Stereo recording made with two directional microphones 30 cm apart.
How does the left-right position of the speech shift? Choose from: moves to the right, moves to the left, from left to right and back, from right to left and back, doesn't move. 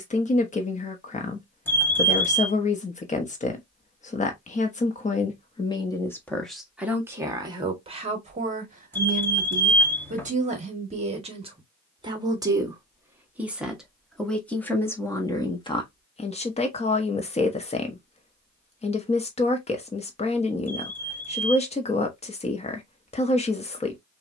from left to right and back.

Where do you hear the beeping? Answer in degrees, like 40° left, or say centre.
10° left.